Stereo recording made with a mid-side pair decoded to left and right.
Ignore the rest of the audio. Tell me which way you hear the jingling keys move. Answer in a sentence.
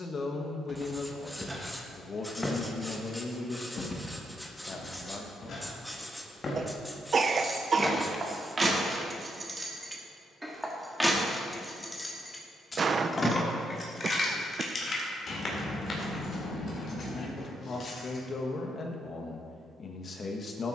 In this clip you hear the jingling keys travel towards the left.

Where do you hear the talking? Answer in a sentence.
In this clip you hear the talking on the left.